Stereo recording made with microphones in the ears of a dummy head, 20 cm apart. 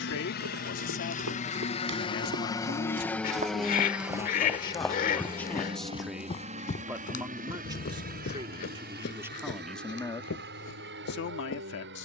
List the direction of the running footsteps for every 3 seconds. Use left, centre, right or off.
right, centre, left, left.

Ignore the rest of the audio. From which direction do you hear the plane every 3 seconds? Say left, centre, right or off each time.
left, centre, right, right.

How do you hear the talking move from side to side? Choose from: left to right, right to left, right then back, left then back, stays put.
right then back.